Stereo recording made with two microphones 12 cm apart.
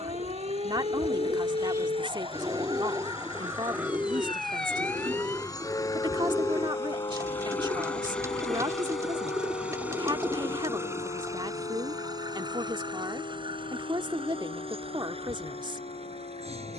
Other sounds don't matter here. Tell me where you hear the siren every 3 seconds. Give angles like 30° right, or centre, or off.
50° right, centre, 40° left, 60° left, 70° left, 70° left.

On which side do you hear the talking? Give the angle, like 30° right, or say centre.
40° right.